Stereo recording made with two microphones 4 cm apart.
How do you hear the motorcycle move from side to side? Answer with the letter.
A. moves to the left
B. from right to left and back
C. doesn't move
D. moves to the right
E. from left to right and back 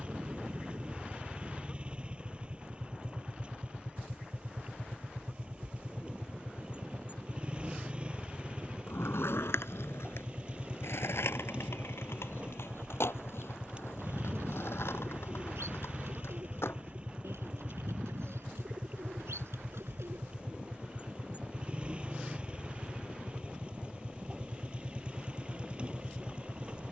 C.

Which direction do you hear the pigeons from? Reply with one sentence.
In this clip you hear the pigeons on the right.